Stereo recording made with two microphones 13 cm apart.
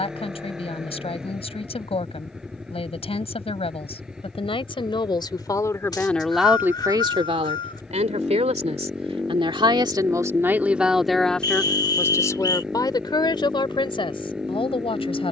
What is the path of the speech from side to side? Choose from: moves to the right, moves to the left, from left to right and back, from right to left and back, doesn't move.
from left to right and back.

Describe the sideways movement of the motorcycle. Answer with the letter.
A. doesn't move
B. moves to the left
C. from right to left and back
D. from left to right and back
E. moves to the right
A.